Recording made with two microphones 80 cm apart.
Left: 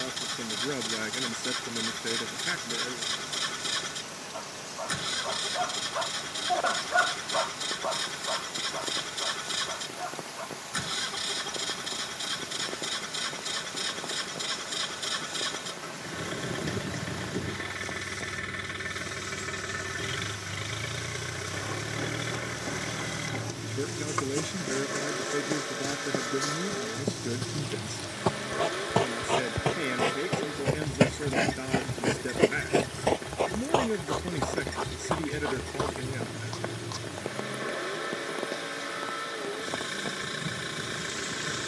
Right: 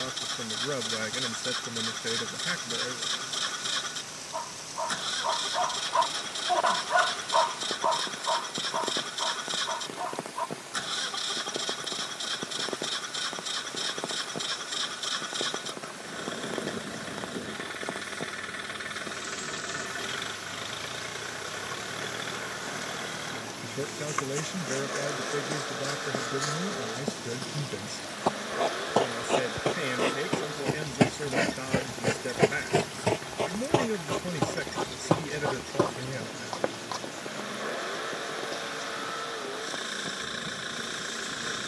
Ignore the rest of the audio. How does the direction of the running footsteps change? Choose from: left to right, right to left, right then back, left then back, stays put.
left to right.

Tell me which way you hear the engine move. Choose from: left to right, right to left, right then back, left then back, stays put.
stays put.